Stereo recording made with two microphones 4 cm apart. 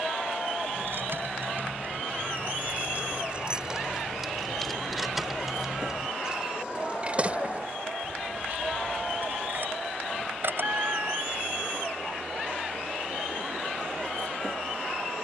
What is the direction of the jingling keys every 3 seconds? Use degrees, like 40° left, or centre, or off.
50° right, 10° right, 30° right, 50° right, off.